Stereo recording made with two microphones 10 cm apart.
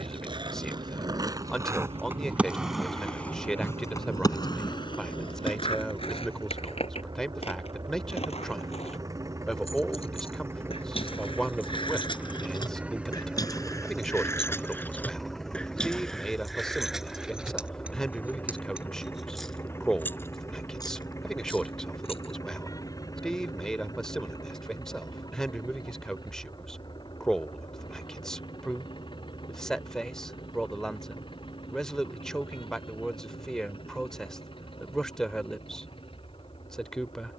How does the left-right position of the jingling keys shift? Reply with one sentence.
In this clip you hear the jingling keys move from left to right and back again.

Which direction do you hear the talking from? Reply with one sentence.
In this clip you hear the talking in the centre.